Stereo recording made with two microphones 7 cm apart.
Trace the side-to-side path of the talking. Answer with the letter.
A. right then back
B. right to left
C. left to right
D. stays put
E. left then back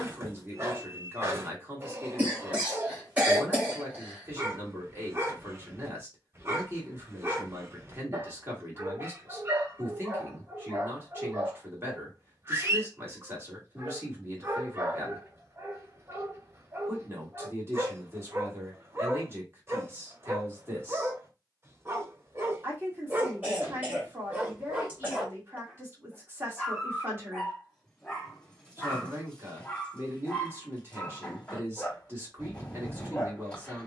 D.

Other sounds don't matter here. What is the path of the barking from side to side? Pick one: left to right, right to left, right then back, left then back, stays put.
right to left.